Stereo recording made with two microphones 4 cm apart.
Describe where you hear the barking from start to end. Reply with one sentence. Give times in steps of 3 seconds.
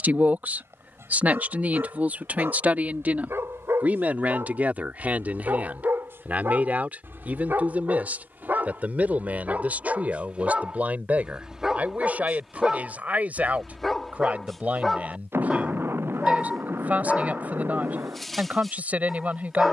You can hear the barking on the right from 0 s and in the centre from 12 s.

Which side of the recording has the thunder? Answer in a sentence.
You can hear the thunder on the right.